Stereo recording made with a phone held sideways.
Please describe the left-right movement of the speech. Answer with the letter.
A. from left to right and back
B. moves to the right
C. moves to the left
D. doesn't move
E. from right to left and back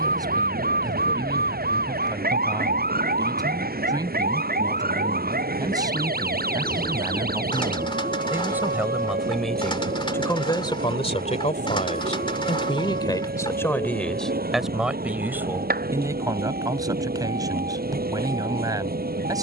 E.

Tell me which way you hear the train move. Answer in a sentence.
You can hear the train stay put.